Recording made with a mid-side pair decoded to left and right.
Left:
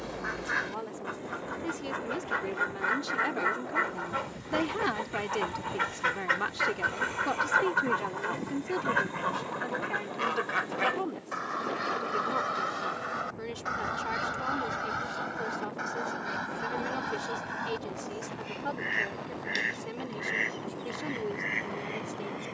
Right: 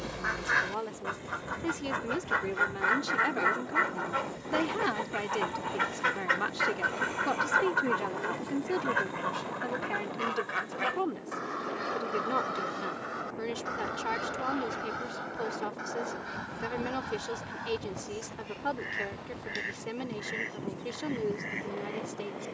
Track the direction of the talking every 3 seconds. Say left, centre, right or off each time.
right, centre, centre, right, right, right, right, right.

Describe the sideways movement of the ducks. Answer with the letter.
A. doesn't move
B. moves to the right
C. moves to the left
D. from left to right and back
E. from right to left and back
C.